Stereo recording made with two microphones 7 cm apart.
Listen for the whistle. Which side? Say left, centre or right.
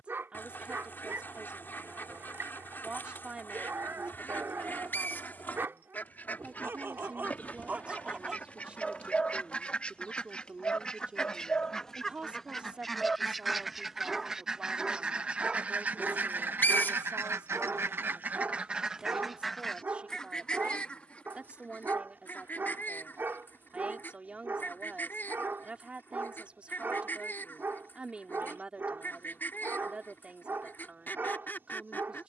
left.